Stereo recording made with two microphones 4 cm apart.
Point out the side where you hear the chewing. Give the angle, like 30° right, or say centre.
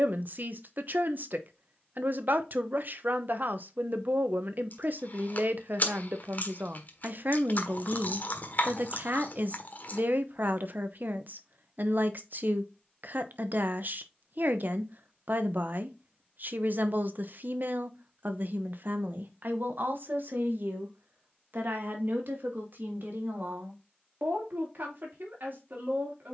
50° left.